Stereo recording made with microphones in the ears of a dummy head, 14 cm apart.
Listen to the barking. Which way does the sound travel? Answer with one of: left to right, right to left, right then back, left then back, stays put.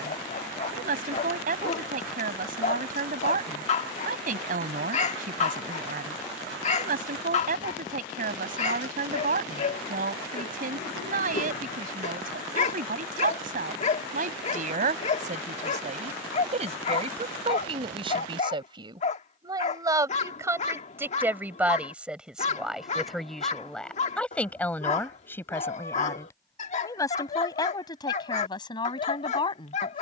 stays put.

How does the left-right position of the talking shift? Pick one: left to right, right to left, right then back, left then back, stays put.
right to left.